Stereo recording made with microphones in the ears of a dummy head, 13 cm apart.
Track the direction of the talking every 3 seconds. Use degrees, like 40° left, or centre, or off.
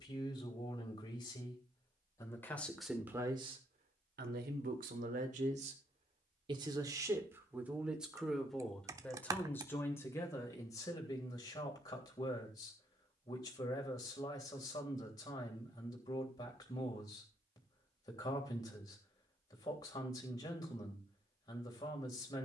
20° left, 50° right, 10° right, 20° left, 30° left, 30° left, 30° left, 30° left.